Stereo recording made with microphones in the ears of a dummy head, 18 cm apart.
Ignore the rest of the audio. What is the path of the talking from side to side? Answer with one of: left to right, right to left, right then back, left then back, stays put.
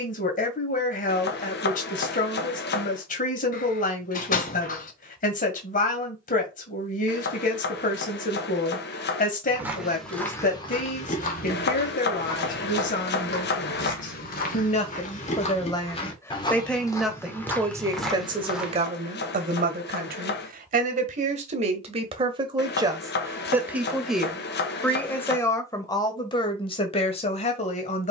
right then back.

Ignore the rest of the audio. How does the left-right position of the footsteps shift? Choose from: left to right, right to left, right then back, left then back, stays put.
left then back.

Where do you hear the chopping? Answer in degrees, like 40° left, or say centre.
50° left.